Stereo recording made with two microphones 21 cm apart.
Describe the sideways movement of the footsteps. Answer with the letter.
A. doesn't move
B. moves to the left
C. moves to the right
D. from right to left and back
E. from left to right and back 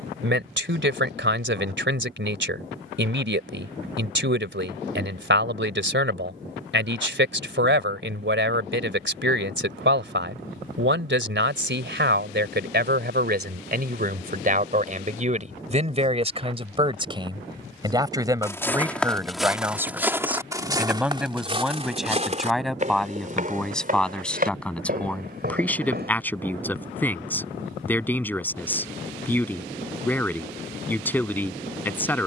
C.